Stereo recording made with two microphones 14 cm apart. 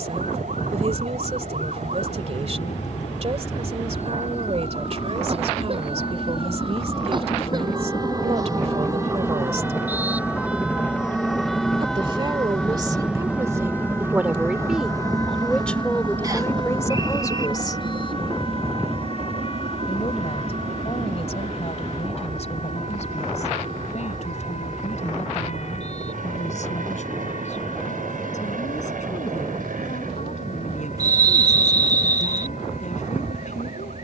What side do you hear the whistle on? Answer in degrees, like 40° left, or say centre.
30° right.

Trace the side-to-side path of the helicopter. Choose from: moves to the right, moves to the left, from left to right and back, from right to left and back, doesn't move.
moves to the right.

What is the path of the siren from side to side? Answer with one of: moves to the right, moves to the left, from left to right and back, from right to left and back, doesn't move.
moves to the left.